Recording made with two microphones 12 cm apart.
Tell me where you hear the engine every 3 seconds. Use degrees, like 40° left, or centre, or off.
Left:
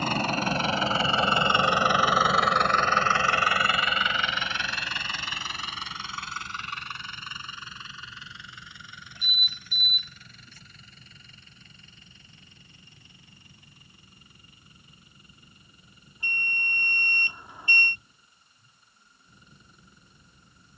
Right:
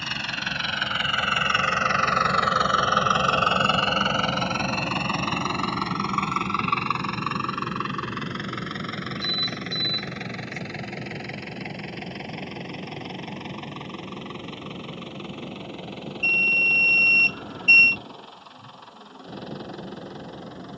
20° left, 40° right, 70° right, 70° right, 80° right, 80° right, 80° right.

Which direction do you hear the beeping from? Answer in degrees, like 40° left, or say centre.
20° left.